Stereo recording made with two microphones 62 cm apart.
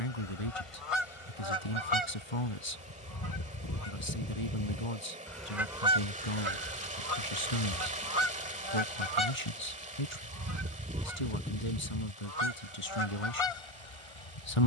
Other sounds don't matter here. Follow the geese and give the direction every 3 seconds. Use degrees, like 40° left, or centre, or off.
50° left, 20° left, 30° right, 20° right, 50° left.